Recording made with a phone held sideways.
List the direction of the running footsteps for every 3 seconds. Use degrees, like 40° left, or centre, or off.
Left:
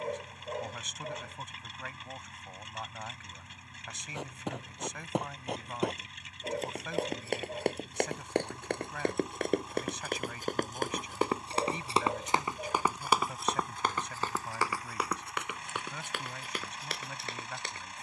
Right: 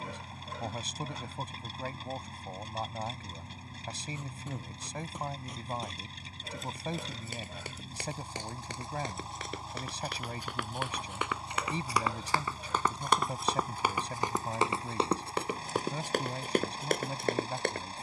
off, 70° left, 60° left, 40° left, centre, 40° right.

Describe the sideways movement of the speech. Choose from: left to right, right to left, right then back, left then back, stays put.
stays put.